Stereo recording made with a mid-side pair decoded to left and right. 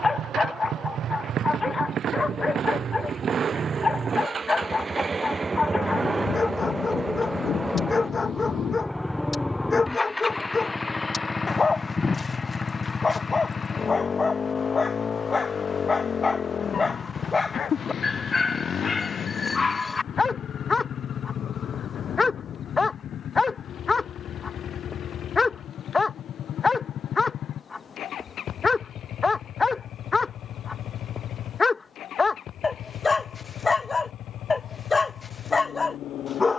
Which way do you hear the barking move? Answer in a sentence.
In this clip you hear the barking stay in one place.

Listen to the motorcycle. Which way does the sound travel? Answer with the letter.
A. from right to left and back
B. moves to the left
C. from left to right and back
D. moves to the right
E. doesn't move
B.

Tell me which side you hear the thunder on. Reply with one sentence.
You can hear the thunder on the left.